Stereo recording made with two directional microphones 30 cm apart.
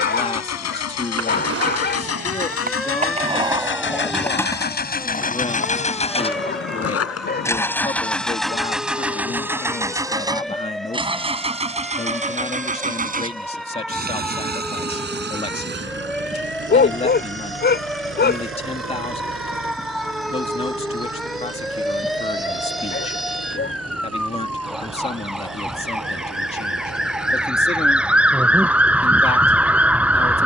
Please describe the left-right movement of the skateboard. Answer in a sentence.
In this clip you hear the skateboard move from right to left.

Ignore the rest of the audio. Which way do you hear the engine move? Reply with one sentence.
You can hear the engine go from the left side to the right.